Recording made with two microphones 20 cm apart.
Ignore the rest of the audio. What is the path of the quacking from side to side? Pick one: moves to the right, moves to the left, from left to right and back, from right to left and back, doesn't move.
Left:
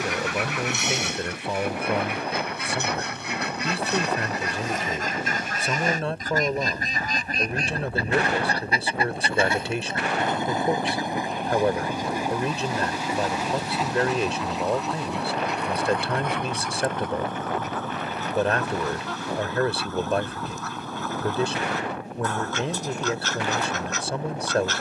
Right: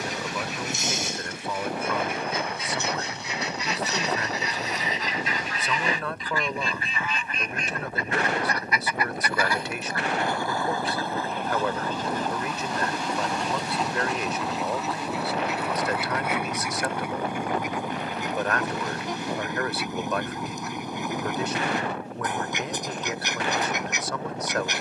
moves to the right.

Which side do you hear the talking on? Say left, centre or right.
left.